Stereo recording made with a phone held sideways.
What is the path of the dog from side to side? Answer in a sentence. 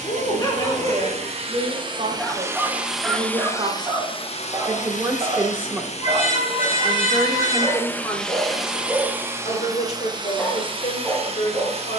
In this clip you hear the dog move from left to right and back again.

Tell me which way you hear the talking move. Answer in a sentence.
In this clip you hear the talking move to the left.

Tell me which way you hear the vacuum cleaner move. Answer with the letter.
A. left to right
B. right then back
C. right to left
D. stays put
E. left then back
E.